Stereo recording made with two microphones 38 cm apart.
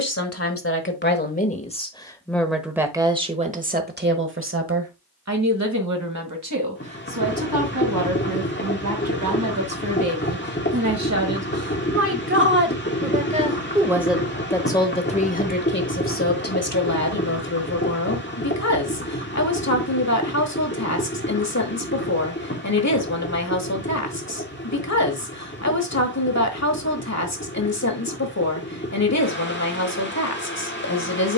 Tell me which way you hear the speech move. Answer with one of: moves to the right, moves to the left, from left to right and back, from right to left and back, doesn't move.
from left to right and back.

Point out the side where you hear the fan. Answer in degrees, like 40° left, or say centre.
30° left.